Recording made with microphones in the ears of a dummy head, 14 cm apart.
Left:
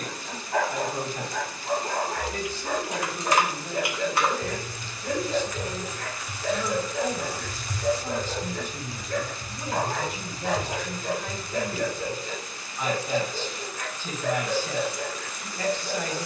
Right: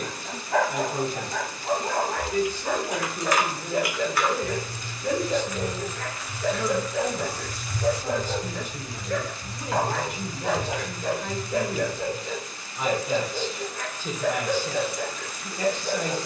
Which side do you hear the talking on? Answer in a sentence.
In this clip you hear the talking in the centre.